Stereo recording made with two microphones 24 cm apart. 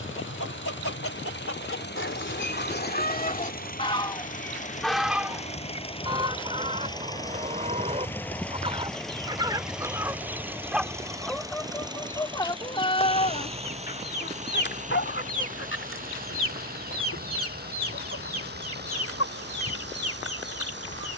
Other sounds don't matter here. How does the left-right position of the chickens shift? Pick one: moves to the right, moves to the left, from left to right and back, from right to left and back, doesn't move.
from left to right and back.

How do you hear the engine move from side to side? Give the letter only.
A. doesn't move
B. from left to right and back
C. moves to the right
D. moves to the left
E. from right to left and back
C.